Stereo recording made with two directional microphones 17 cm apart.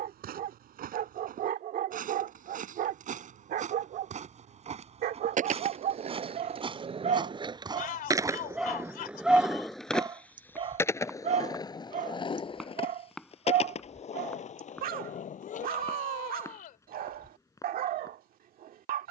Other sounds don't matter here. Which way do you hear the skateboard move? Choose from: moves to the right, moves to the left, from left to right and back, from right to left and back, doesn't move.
moves to the left.